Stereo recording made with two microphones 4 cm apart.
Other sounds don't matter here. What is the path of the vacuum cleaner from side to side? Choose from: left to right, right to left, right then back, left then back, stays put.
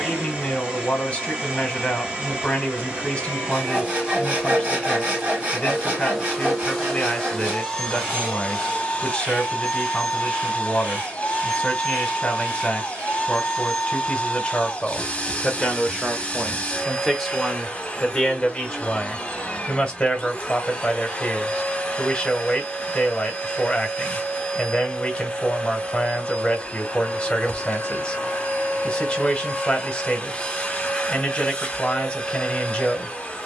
right to left.